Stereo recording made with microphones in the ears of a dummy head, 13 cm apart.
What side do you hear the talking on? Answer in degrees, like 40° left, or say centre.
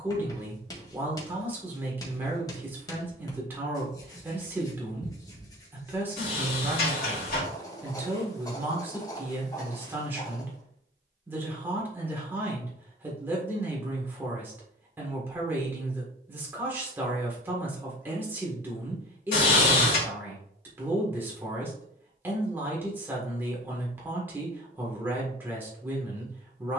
10° right.